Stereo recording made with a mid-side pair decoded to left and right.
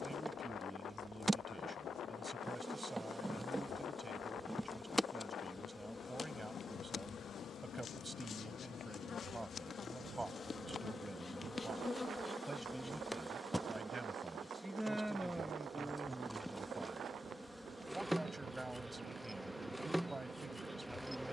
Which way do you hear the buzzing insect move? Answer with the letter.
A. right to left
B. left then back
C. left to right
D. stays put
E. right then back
B.